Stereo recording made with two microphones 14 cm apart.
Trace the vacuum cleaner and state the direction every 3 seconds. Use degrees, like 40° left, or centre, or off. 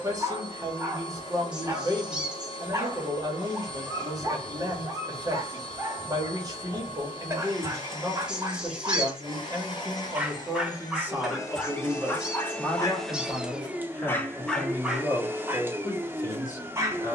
40° left, 40° left, 40° left, 30° left, centre, 20° right.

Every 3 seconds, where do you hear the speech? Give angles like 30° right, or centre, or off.
30° right, 30° right, 30° right, 20° right, 10° left, 20° left.